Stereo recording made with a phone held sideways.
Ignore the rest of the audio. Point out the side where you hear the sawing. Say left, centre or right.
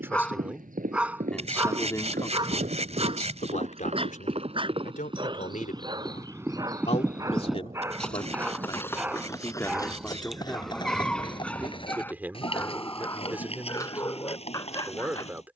right.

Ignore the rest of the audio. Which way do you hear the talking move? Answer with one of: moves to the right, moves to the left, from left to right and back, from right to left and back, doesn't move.
from right to left and back.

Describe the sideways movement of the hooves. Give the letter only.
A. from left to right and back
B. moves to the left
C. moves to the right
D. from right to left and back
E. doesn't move
B.